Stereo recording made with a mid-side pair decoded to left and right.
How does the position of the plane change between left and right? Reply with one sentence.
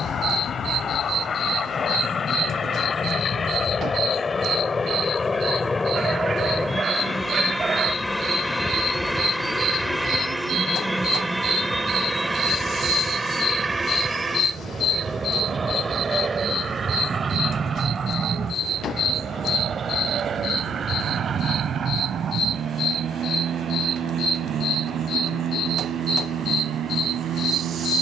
You can hear the plane travel towards the right.